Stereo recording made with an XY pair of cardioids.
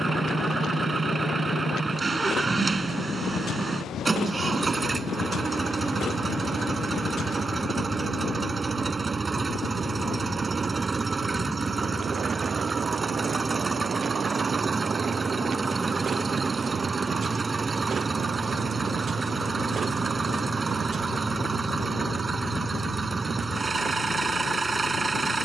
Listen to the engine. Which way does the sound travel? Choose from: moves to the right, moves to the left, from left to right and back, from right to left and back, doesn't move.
doesn't move.